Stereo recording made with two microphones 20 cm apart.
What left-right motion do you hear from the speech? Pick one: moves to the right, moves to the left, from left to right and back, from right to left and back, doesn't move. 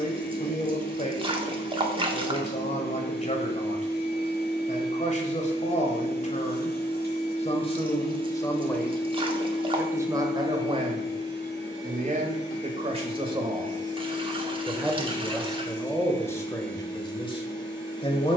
from left to right and back.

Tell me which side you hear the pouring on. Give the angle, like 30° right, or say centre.
30° right.